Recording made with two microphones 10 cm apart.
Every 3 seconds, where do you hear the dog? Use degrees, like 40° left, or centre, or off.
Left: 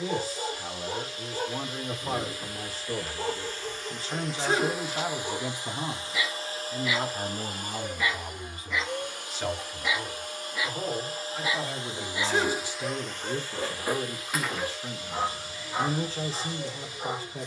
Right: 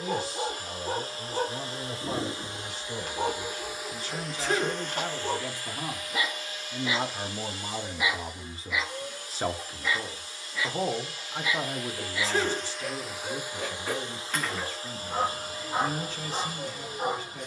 60° right, 50° right, 20° right, 20° left, 20° left, 40° right.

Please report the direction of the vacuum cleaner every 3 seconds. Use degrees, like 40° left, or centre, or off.
30° right, centre, 50° left, 50° left, 10° right, 40° right.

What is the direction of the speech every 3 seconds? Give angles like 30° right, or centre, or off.
40° left, 20° left, 20° right, 40° right, 30° left, 40° left.